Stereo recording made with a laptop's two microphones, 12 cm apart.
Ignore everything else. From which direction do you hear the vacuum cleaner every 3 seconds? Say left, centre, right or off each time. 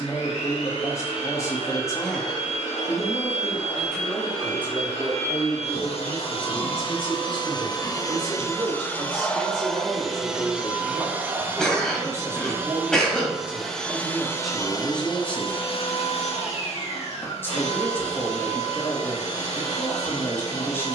left, left, left, centre, centre, left, left.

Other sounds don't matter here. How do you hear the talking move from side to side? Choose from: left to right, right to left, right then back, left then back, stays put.
right then back.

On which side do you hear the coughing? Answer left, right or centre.
centre.